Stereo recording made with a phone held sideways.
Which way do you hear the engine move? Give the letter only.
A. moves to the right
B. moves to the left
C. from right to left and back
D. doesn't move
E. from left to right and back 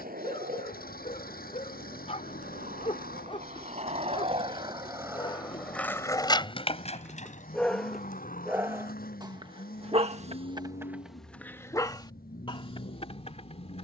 D.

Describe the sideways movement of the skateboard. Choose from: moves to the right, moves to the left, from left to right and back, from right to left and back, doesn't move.
moves to the left.